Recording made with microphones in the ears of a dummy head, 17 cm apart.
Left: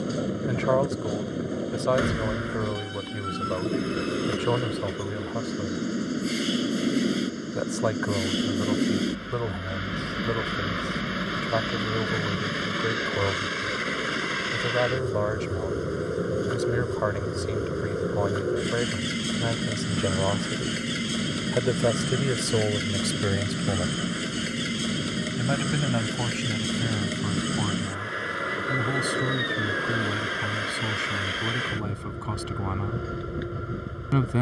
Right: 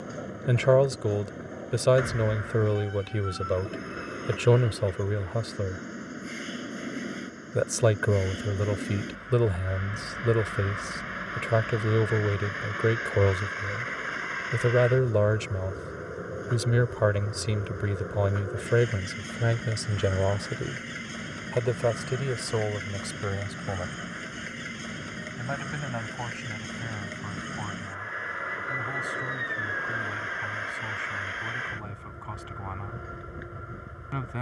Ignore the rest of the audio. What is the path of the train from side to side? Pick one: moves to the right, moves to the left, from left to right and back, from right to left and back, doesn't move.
doesn't move.